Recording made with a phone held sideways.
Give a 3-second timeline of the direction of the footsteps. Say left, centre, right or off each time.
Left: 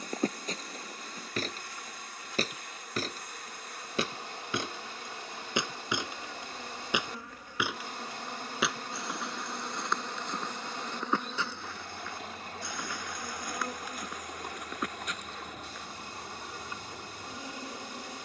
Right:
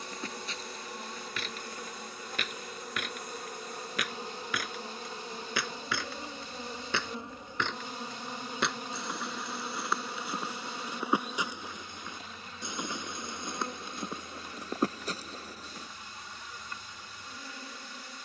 left, left, centre, centre, right, right.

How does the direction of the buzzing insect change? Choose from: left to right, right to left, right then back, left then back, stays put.
right to left.